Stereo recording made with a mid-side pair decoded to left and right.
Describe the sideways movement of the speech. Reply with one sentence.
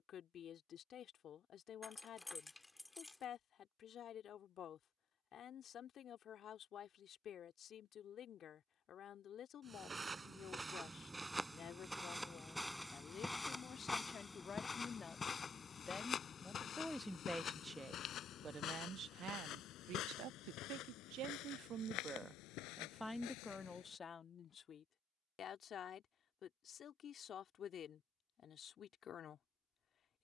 In this clip you hear the speech move from left to right and back again.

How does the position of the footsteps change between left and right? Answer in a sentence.
In this clip you hear the footsteps travel towards the left.